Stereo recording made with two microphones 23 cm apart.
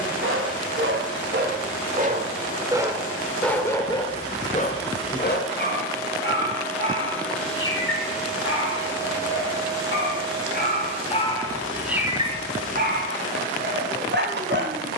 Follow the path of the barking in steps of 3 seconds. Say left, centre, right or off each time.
right, left, left, left, right.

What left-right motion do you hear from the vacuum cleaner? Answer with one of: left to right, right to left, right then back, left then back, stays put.
left to right.